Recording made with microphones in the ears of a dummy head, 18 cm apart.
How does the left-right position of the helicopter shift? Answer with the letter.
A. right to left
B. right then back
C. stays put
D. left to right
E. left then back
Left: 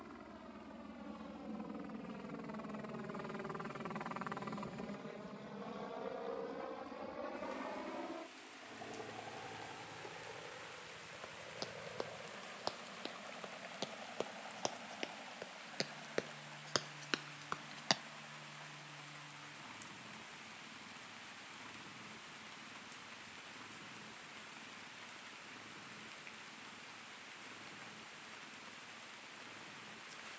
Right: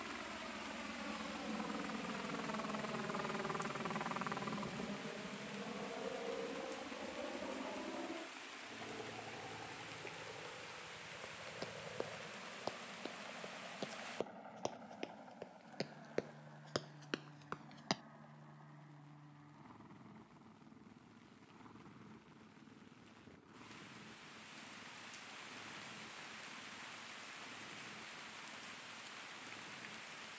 A.